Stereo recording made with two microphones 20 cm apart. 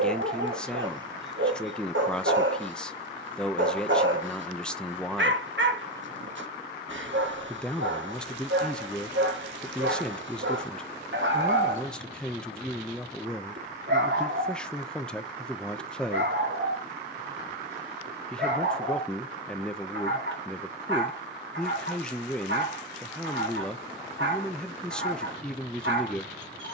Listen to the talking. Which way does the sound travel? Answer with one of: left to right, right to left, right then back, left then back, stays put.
stays put.